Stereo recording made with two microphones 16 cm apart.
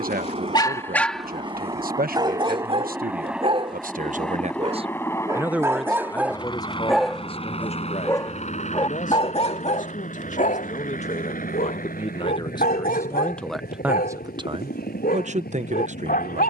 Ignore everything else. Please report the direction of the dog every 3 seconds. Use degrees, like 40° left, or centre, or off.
centre, 20° right, 10° left, 50° left, 70° left, 70° left.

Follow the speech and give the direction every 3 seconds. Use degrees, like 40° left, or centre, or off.
70° right, 40° right, 30° left, 50° left, 10° left, 50° right.